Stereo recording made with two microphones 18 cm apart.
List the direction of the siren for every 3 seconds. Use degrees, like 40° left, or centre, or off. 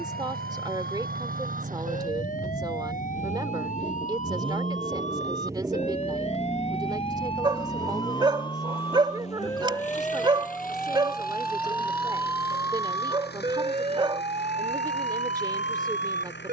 50° left, 50° left, 30° left, 10° left, 30° right, 40° right.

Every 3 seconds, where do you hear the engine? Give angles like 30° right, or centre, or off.
50° right, 30° right, 10° left, 50° left, 60° left, 70° left.